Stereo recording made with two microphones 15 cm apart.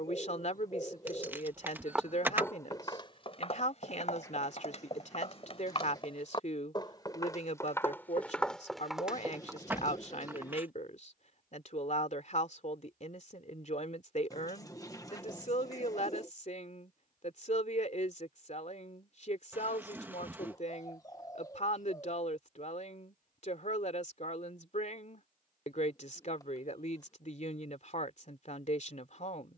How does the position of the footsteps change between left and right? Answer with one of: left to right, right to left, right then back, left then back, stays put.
left then back.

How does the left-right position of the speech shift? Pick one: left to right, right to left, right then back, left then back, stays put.
stays put.